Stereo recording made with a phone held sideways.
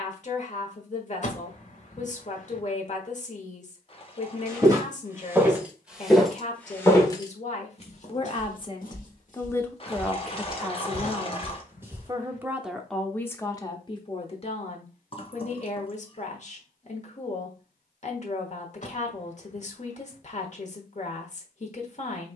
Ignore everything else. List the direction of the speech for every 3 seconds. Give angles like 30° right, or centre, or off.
50° left, 50° left, 40° left, centre, 20° left, 50° left, 50° left, 50° left.